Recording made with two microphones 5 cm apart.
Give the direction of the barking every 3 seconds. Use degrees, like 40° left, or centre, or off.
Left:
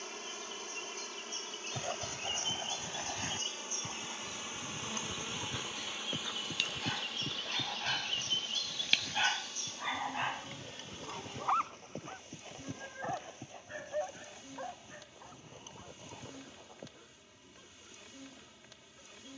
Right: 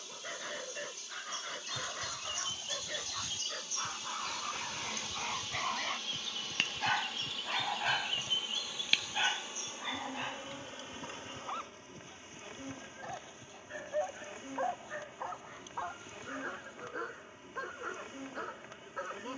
70° right, 60° right, 20° right, 20° left, centre, 60° right, 70° right.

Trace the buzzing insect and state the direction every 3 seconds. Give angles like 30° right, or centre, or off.
50° left, 30° left, centre, 30° right, 30° right, 30° right, 30° right.